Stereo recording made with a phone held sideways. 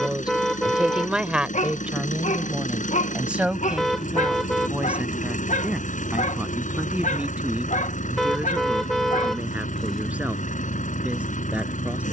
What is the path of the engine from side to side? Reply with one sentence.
In this clip you hear the engine stay in one place.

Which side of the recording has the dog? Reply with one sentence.
You can hear the dog on the left.